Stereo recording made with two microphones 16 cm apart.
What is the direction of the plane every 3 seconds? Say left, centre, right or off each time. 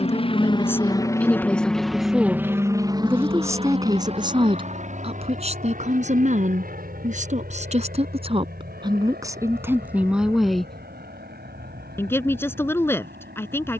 centre, right, right, right, right.